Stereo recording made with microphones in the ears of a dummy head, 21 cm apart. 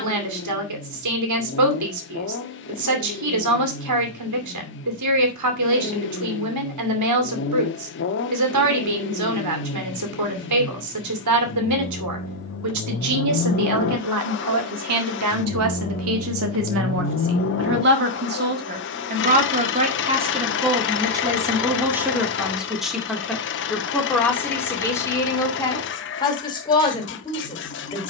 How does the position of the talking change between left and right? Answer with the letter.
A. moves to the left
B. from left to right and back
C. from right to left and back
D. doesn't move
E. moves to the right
A.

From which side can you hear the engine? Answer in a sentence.
In this clip you hear the engine on the left.